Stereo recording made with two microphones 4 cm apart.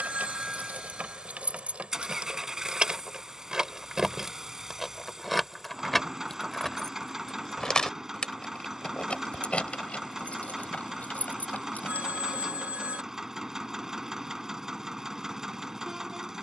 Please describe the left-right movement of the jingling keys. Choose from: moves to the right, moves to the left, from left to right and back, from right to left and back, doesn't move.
moves to the left.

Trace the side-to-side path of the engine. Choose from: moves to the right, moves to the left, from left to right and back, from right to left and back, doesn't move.
doesn't move.